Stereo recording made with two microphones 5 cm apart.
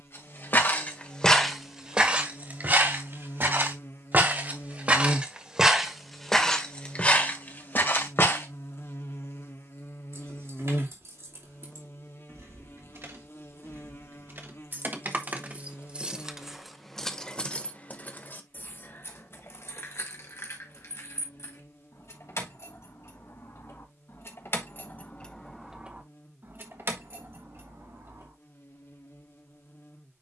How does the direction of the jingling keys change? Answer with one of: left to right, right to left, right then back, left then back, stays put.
left then back.